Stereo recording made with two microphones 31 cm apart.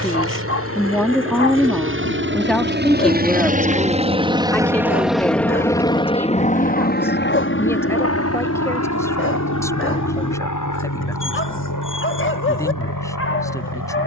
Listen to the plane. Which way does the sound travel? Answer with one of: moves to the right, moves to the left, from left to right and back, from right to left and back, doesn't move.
moves to the left.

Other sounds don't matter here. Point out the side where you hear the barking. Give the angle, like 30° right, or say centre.
40° left.